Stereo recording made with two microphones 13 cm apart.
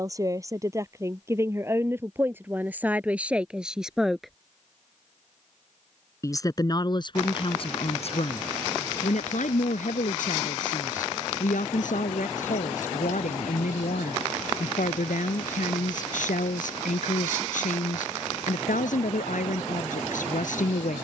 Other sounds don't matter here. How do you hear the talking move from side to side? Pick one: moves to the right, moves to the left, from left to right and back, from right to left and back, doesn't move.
moves to the left.